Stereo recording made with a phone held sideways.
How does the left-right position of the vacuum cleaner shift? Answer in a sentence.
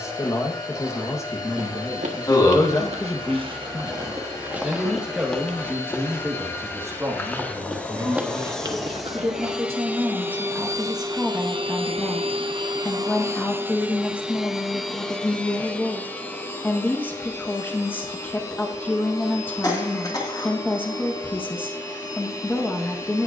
In this clip you hear the vacuum cleaner go right and come back.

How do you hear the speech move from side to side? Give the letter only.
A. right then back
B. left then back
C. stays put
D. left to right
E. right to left
A.